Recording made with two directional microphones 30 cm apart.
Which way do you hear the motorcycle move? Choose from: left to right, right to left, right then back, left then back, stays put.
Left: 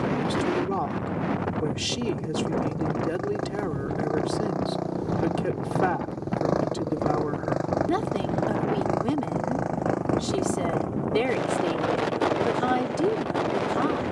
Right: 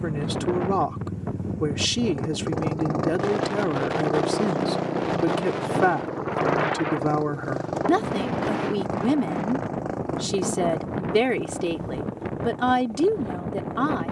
right to left.